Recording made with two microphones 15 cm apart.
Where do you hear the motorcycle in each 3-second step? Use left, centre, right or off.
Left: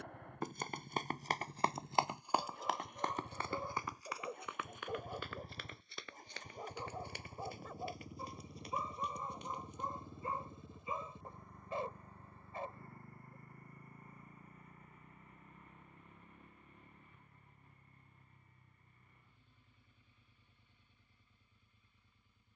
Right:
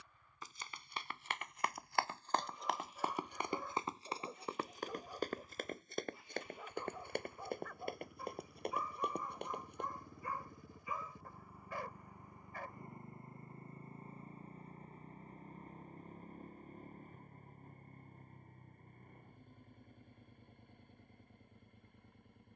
left, left, left, centre, right, right, right, right.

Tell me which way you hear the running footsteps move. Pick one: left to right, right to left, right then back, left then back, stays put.
left to right.